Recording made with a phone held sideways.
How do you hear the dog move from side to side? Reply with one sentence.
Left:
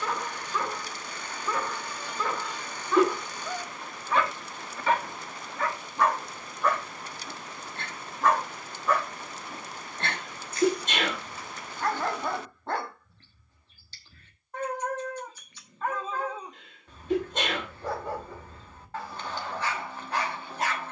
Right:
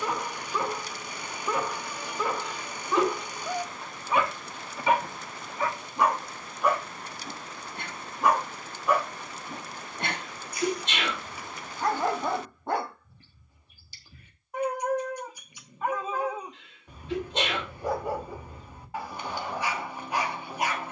You can hear the dog stay in one place.